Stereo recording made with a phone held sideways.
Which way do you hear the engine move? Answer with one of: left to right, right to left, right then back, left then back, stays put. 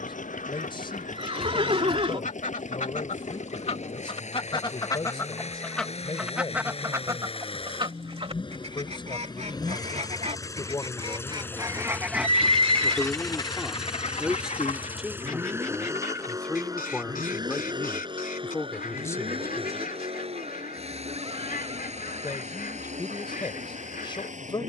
left to right.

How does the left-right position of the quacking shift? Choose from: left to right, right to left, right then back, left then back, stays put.
right then back.